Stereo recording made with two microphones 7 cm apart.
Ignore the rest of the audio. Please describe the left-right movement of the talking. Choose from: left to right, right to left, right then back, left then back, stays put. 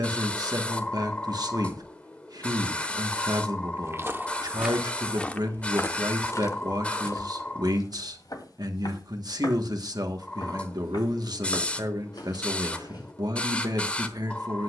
stays put.